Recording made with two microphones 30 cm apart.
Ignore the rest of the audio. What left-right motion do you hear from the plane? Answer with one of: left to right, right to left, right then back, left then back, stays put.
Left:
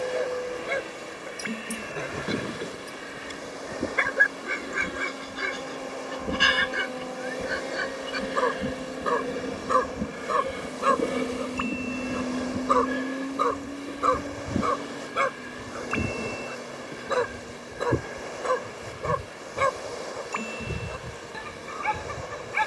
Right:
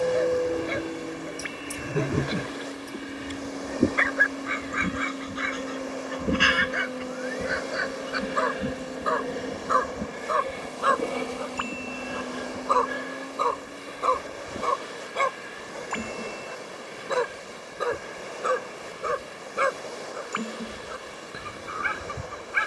right to left.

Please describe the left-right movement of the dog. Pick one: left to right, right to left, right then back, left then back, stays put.
left to right.